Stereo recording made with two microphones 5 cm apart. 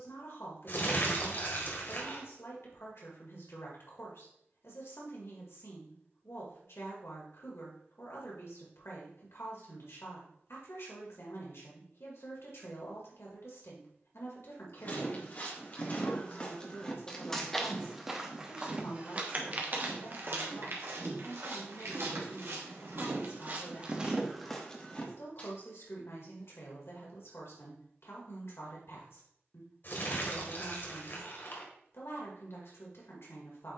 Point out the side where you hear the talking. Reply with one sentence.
In this clip you hear the talking on the left.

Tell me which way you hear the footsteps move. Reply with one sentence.
You can hear the footsteps move from left to right and back again.